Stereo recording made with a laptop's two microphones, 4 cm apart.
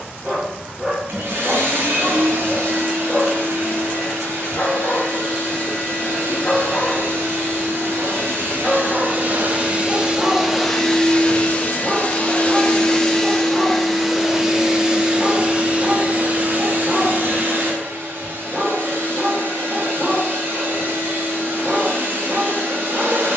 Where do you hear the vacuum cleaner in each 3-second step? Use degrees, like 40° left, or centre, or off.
60° right, 60° right, 50° right, centre, 10° left, 40° right, 50° right, 50° right.